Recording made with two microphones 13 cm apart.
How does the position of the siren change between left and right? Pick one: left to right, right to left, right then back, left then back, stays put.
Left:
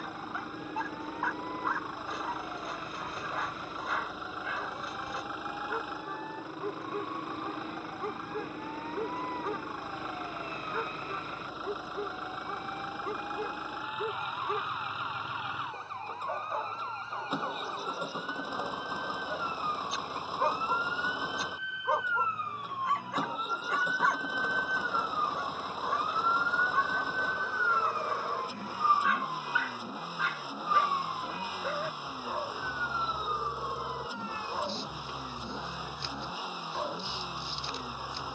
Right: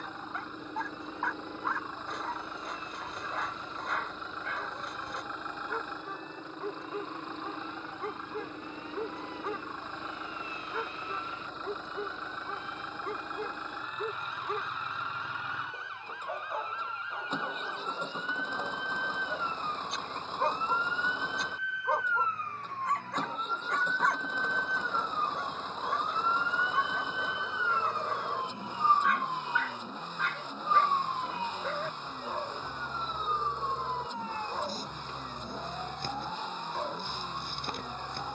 left to right.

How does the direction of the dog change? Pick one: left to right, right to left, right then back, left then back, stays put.
stays put.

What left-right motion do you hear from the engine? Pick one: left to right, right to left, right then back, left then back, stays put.
stays put.